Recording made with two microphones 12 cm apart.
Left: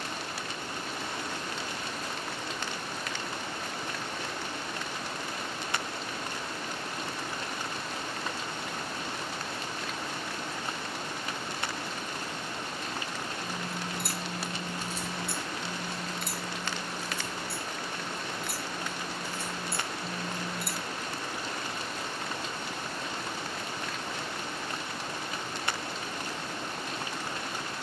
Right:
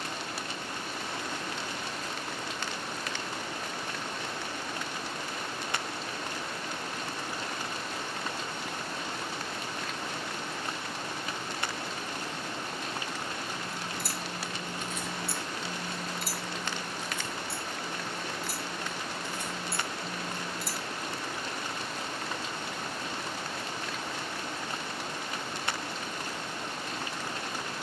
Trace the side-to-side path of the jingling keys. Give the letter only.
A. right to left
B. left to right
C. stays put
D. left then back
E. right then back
E.